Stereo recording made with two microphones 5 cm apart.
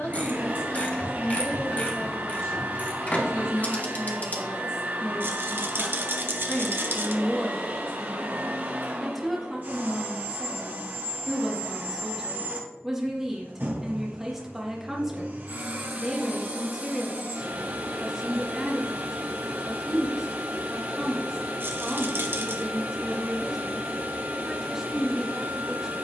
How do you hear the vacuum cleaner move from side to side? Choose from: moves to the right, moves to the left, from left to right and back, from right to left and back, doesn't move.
doesn't move.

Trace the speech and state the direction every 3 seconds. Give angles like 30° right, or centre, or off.
70° left, 50° left, 20° left, 10° right, 10° right, 10° right, 10° right, 10° right, 10° right.